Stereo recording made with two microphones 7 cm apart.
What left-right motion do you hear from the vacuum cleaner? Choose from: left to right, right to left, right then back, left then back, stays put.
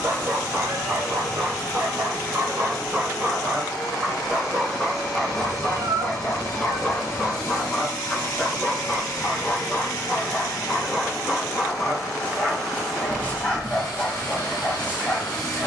stays put.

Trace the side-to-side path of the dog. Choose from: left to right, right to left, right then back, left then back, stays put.
right to left.